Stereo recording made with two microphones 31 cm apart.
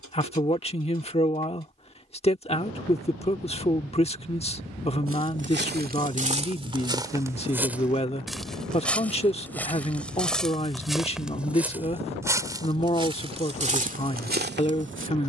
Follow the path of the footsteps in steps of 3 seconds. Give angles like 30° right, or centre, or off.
off, 40° right, 10° right, centre, 20° right.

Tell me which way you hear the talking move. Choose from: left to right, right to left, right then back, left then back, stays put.
stays put.